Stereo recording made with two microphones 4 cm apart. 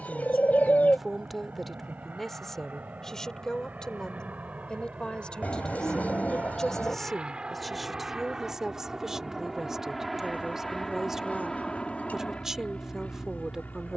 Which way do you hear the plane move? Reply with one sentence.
In this clip you hear the plane travel towards the left.